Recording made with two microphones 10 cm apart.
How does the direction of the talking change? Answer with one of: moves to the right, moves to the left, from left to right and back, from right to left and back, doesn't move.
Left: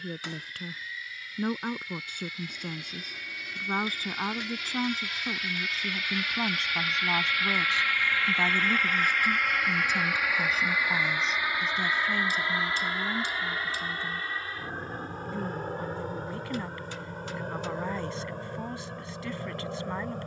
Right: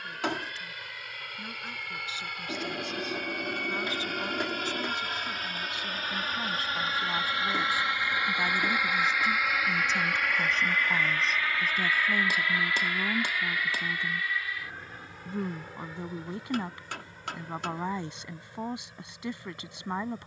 moves to the right.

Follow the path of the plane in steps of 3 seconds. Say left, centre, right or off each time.
right, right, right, centre, left, left, left.